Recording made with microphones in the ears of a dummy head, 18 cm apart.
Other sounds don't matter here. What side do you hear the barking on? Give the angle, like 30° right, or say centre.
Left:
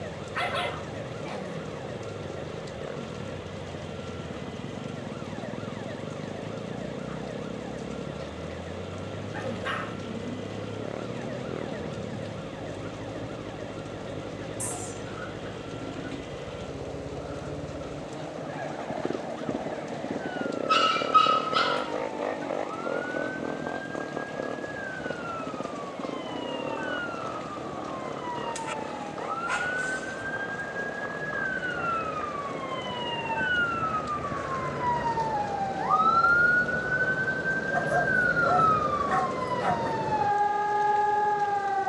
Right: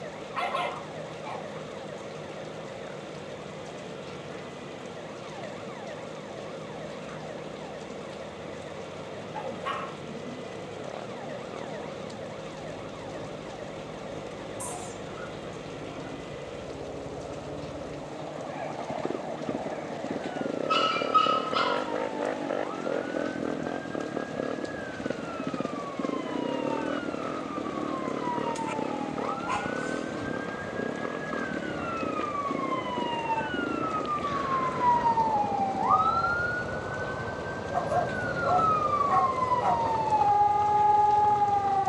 20° left.